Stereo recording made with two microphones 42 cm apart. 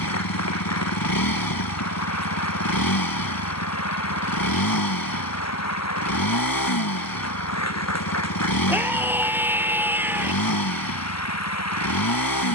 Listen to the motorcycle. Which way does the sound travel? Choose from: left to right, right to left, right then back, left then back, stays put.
stays put.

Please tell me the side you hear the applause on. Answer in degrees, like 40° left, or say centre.
40° left.